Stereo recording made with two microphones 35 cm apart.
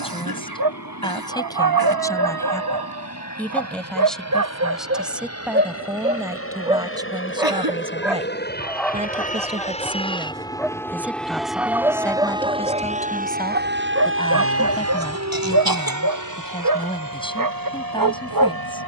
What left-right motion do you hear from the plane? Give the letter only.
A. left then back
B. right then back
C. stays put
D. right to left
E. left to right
E.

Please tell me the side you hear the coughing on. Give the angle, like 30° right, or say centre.
70° right.